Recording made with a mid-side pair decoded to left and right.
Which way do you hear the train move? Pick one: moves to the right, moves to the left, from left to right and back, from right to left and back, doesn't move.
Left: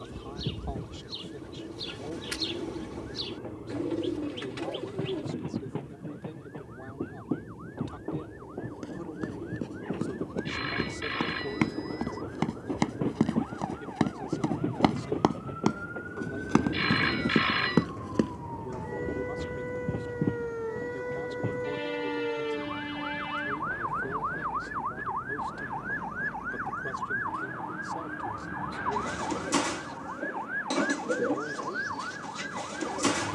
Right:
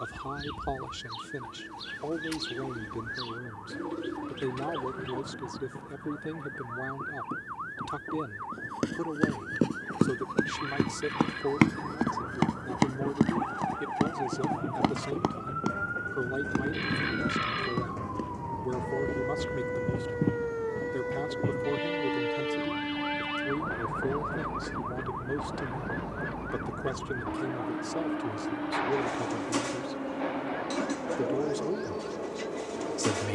moves to the right.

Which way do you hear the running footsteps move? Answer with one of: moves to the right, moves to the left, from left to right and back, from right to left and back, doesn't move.
moves to the left.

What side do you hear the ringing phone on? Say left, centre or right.
left.